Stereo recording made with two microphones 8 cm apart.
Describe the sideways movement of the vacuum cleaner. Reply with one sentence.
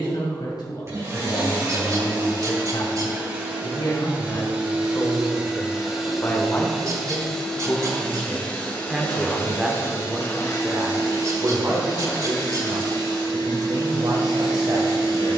In this clip you hear the vacuum cleaner move from right to left.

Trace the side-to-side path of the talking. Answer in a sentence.
In this clip you hear the talking travel towards the right.